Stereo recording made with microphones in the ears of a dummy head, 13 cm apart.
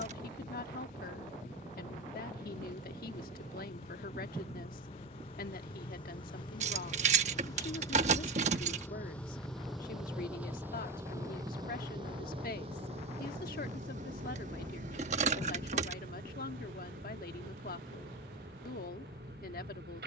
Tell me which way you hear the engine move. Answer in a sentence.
In this clip you hear the engine move from left to right.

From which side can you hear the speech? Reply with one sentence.
In this clip you hear the speech on the left.